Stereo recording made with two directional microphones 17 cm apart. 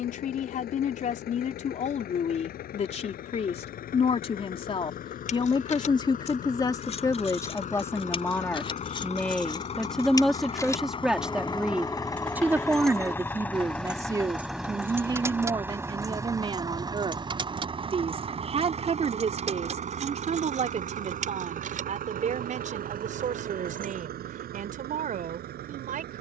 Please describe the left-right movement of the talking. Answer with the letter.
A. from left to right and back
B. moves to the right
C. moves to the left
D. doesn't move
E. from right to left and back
B.